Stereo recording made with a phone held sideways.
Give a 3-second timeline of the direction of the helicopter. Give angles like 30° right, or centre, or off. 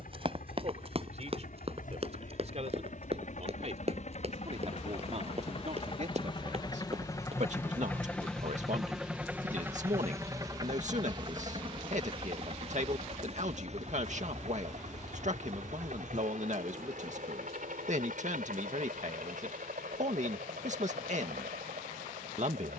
70° left, 50° left, 20° left, 20° right, 50° right, 60° right, 60° right, 70° right.